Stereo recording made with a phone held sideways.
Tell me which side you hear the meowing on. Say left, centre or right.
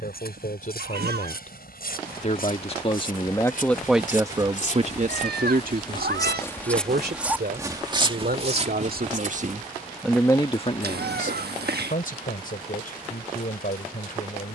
right.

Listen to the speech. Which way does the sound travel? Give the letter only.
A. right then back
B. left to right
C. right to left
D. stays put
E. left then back
A.